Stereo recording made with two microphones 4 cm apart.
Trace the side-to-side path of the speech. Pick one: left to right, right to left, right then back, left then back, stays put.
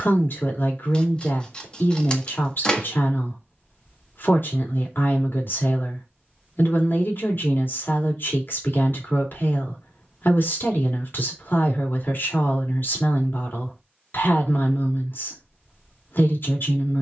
stays put.